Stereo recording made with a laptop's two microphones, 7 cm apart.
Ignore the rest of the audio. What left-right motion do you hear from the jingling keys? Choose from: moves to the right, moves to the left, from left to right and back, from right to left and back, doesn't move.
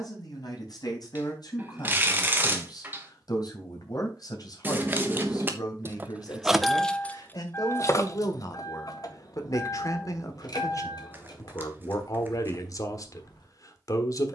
moves to the left.